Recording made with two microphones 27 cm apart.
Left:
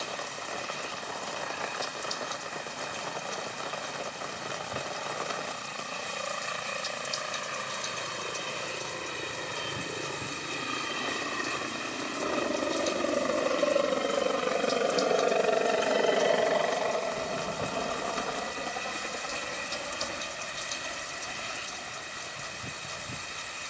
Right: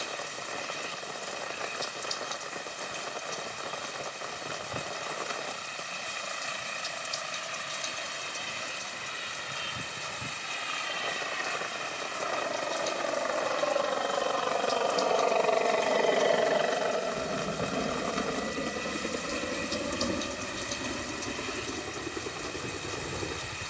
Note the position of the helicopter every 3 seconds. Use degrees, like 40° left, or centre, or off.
70° left, 70° left, 60° left, 50° left, 40° left, centre, 40° right, 60° right.